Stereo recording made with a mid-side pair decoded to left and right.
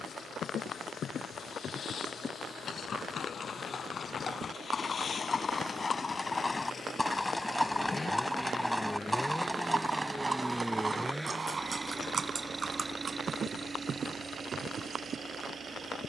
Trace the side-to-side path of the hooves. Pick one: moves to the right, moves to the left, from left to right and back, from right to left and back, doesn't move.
moves to the right.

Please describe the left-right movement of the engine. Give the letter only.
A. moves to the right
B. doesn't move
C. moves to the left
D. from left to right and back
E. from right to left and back
A.